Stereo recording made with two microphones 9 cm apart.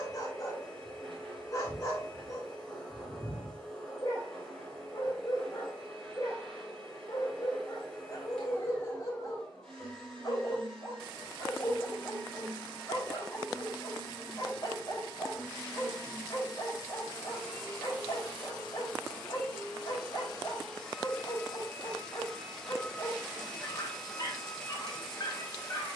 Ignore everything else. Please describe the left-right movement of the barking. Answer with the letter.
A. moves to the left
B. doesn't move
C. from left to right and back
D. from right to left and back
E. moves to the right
B.